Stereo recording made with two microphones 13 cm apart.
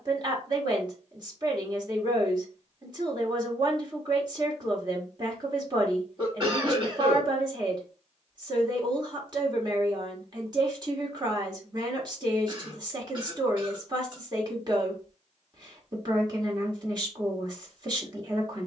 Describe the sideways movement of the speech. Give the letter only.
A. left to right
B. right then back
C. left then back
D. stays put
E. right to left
D.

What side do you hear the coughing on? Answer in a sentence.
In this clip you hear the coughing on the right.